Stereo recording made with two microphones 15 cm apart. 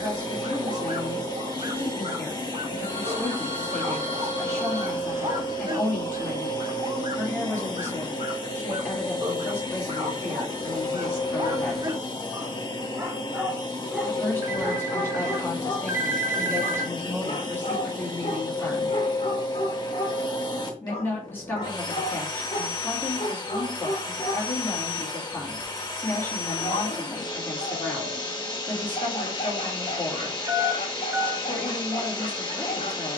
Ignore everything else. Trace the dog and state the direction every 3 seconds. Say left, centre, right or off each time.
right, right, right, right, centre, left, left, left, left, left, left.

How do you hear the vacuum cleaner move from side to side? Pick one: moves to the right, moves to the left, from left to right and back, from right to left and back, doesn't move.
doesn't move.